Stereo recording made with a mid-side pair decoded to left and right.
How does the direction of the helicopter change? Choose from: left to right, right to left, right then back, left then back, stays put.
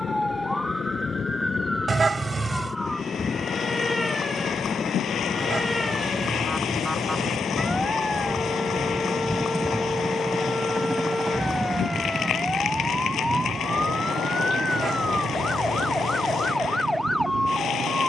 left to right.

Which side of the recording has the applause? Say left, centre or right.
left.